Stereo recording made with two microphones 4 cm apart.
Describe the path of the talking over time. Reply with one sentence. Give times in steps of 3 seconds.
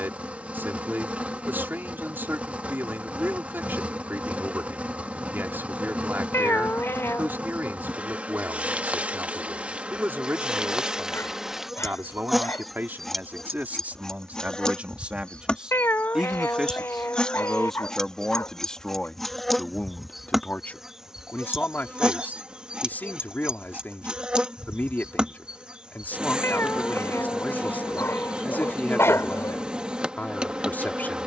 You can hear the talking on the right from 0 s, in the centre from 15 s and on the left from 18 s.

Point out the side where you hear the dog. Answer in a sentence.
You can hear the dog on the left.